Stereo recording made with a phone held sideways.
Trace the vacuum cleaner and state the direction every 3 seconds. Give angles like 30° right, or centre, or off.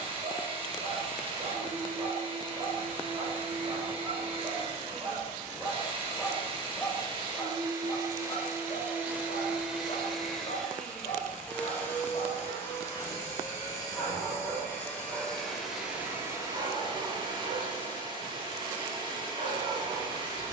40° right, 40° right, 30° right, centre, 20° left, 20° right, 30° right.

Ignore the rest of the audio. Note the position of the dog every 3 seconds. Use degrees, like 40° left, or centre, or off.
40° right, 30° right, 20° left, 50° left, 10° left, 30° right, 40° right.